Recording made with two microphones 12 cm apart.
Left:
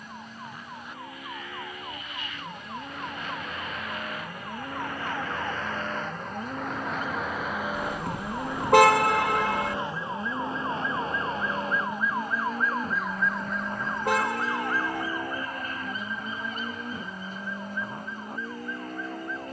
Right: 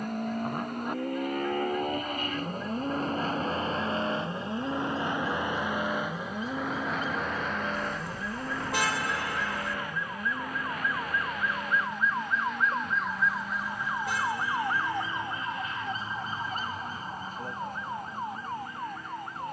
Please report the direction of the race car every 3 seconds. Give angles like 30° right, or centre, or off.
50° right, 20° right, centre, 30° left, 40° left, 50° left, 50° left.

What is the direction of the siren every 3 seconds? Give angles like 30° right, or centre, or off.
70° left, 60° left, 50° left, 20° left, centre, 30° right, 50° right.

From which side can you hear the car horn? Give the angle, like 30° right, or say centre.
70° left.